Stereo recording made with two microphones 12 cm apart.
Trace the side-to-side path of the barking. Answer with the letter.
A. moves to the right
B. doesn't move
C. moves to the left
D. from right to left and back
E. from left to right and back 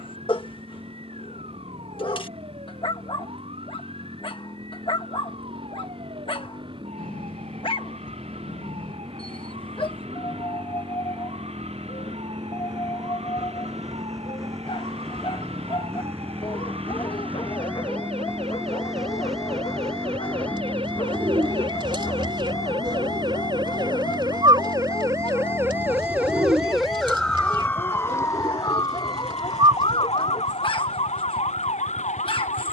B.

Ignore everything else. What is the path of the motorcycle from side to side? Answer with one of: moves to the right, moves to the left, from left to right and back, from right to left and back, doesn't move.
moves to the left.